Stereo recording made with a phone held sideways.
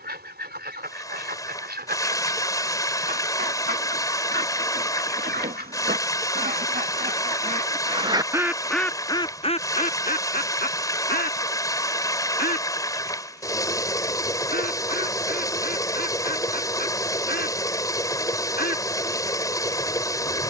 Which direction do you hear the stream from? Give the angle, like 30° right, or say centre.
20° left.